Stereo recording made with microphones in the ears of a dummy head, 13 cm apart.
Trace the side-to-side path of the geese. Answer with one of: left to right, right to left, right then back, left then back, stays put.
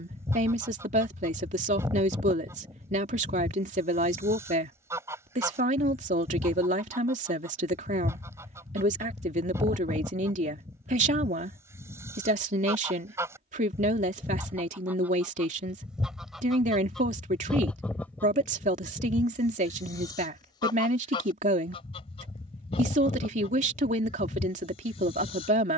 right to left.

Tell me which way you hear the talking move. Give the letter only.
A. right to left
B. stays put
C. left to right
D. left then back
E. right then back
B.